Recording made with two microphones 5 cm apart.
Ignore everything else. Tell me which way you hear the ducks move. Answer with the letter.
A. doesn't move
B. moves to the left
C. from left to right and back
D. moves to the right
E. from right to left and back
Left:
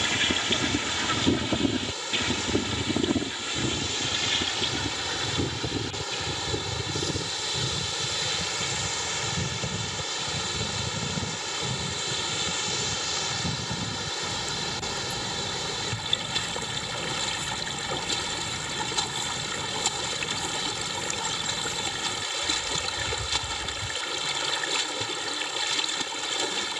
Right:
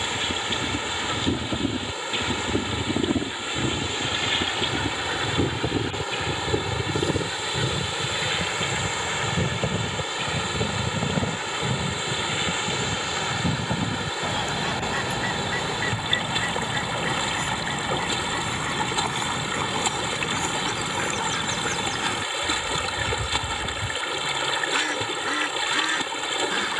D.